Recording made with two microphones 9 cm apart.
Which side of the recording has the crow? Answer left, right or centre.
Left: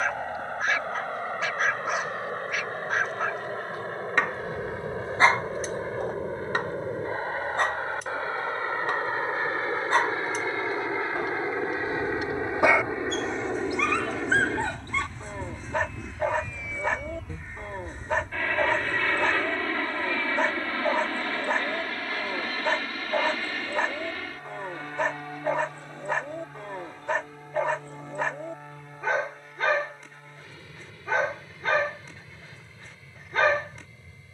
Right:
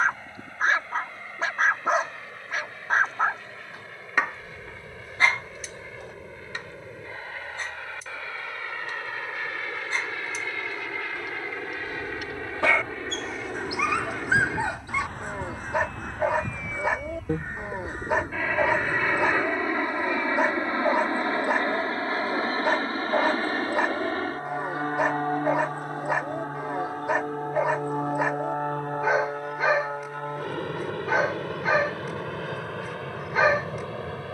right.